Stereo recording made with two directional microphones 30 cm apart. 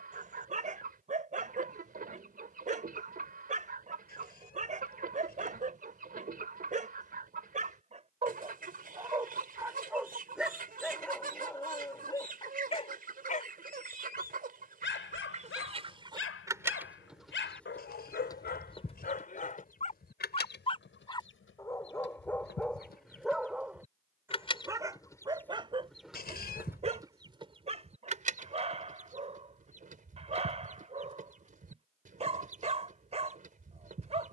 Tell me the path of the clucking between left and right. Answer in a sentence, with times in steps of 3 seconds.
You can hear the clucking on the right from 0 s, in the centre from 15 s, on the left from 18 s, in the centre from 24 s and on the right from 27 s.